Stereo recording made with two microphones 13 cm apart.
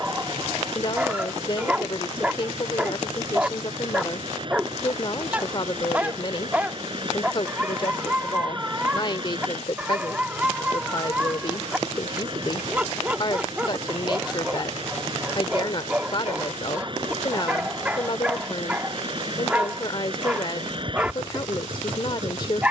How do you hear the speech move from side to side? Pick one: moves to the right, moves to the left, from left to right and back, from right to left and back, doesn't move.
doesn't move.